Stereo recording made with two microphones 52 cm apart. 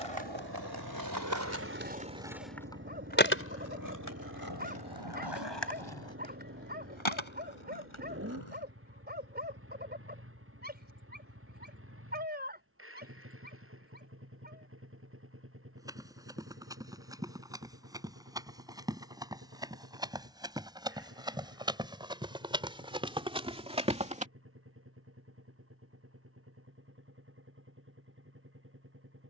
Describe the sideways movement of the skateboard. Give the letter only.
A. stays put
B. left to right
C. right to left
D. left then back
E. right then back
C.